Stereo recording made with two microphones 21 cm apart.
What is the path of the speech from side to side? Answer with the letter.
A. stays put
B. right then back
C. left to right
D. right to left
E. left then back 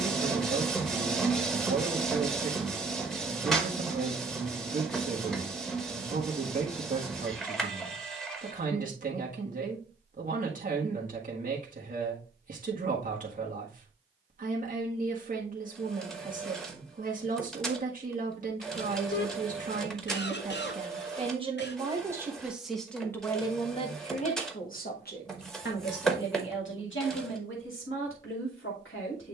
D.